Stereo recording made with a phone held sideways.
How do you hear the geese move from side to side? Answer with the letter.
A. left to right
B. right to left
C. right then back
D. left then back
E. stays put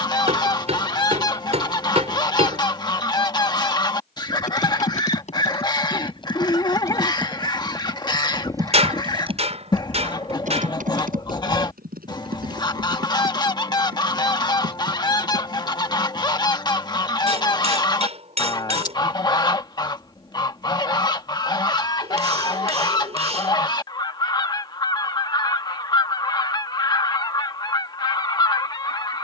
E.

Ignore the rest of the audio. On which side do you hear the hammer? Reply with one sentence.
In this clip you hear the hammer on the right.